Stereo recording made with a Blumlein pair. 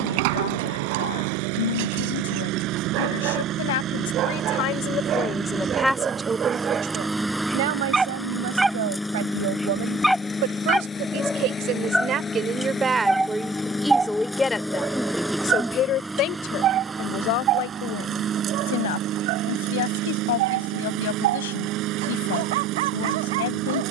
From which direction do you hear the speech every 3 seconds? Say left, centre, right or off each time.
left, left, right, right, centre, left, left, left.